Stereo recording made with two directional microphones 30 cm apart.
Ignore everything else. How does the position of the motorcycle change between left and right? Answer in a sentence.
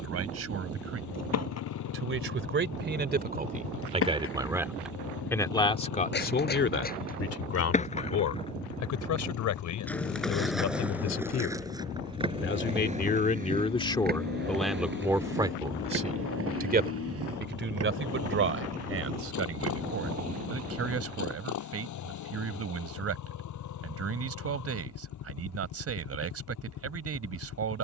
In this clip you hear the motorcycle stay in one place.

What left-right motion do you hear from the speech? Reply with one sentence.
In this clip you hear the speech go left and come back.